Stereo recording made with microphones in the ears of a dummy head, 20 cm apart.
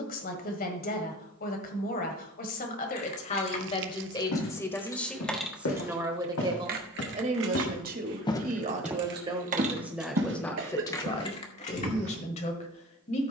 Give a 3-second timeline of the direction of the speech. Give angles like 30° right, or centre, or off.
40° left, 10° left, 30° right, 10° left, 30° left.